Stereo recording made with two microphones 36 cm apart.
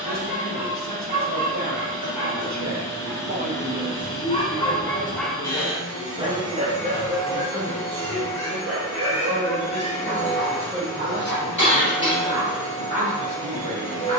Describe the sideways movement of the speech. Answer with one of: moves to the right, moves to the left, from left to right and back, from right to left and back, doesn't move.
from right to left and back.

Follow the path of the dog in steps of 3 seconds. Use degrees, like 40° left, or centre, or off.
50° left, 20° left, 30° right, 50° right, 60° right.